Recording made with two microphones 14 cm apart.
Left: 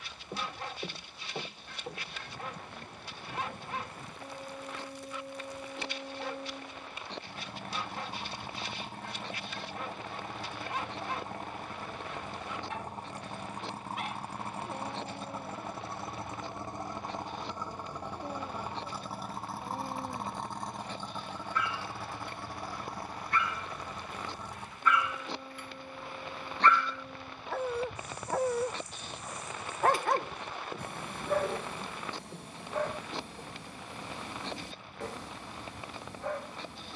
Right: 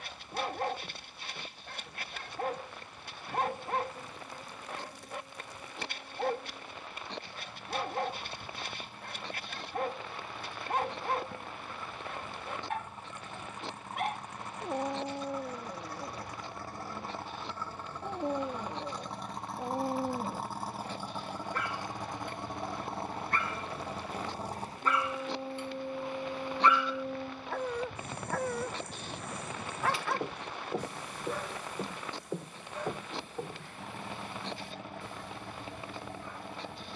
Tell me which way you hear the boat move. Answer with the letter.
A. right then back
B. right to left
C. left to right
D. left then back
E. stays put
C.